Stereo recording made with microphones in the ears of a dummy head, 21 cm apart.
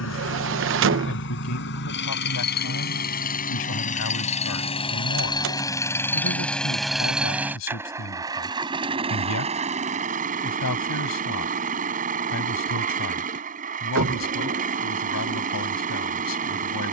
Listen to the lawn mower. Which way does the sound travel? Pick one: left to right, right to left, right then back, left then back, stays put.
left to right.